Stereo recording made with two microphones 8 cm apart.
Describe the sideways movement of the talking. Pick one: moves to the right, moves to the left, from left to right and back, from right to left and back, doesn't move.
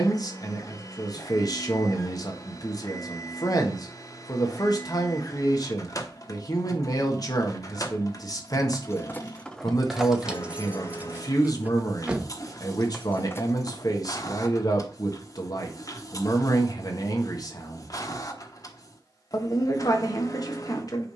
doesn't move.